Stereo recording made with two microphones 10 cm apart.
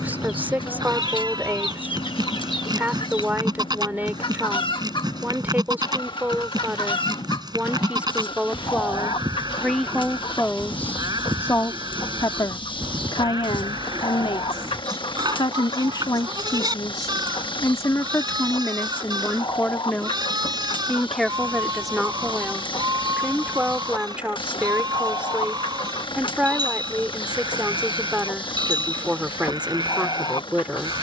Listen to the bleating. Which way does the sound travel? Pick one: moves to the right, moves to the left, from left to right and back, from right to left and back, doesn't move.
doesn't move.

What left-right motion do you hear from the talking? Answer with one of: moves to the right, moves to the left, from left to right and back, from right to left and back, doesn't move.
from right to left and back.